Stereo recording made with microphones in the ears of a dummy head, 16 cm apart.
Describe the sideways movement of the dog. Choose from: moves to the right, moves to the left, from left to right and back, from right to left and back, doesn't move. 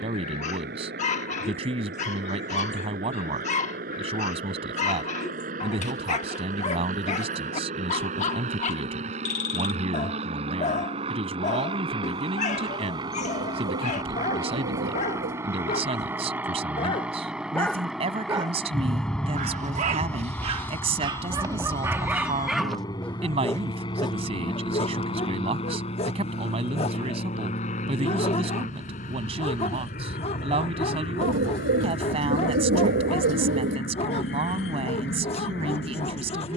from left to right and back.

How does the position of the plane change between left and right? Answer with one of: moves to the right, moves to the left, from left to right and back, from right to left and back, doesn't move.
moves to the left.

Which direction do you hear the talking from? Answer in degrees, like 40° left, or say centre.
30° right.